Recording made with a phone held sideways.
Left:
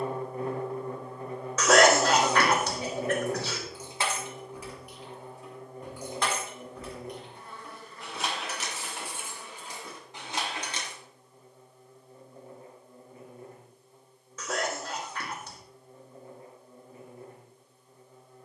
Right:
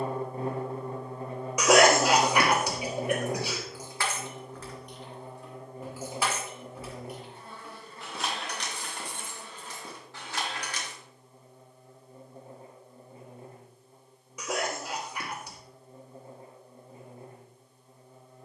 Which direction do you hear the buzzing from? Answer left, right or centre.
right.